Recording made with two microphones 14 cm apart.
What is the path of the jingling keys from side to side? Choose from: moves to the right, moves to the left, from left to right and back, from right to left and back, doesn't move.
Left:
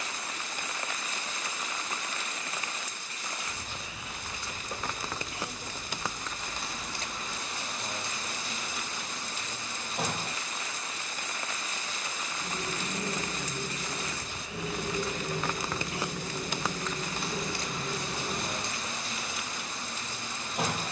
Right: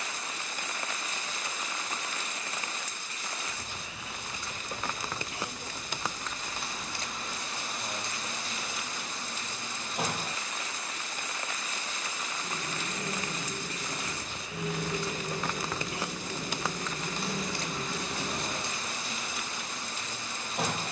moves to the right.